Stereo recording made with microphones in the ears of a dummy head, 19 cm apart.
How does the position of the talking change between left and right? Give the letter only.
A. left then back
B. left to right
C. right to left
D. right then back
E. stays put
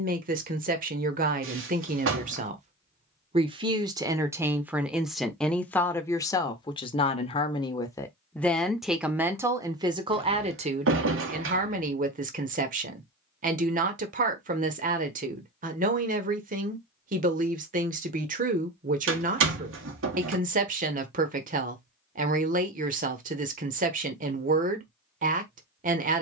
A.